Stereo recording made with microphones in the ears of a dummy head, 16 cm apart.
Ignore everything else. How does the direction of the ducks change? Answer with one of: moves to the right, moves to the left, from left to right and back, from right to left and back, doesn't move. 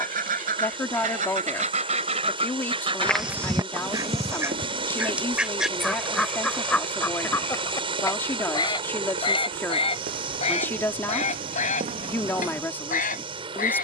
moves to the left.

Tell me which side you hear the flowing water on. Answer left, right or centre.
right.